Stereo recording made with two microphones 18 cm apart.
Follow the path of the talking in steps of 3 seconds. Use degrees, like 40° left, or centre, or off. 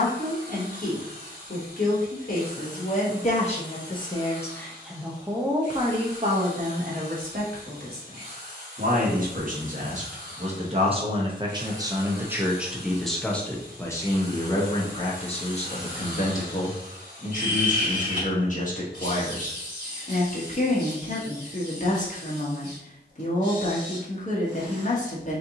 50° left, 10° left, 50° right, 40° right, 10° left, 40° left, 50° left, 50° left, 50° left.